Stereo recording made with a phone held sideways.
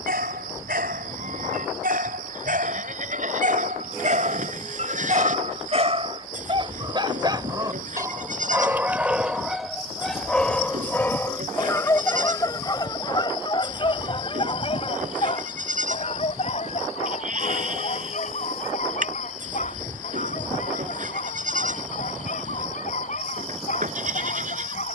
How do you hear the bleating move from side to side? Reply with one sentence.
In this clip you hear the bleating stay put.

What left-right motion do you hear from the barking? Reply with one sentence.
You can hear the barking move to the left.